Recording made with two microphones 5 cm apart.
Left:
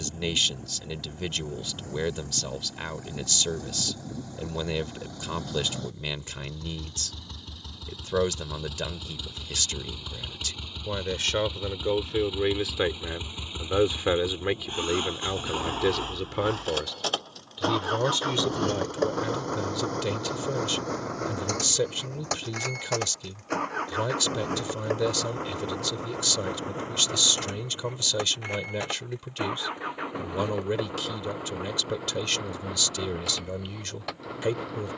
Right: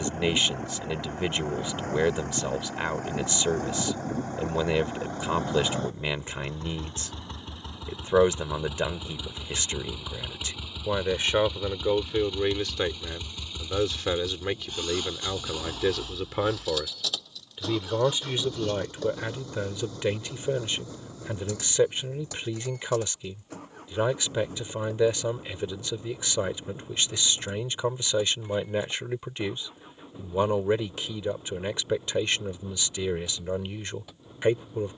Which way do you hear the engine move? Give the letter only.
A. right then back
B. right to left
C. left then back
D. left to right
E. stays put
B.